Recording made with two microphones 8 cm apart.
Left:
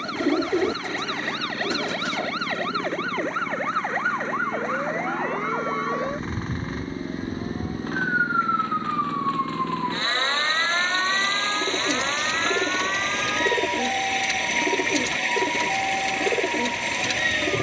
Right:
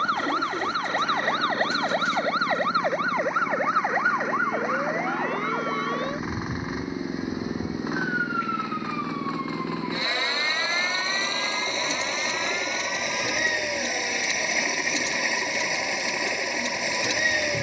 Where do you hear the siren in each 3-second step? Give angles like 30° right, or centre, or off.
30° right, centre, 20° left, 40° left, 50° left, 60° left.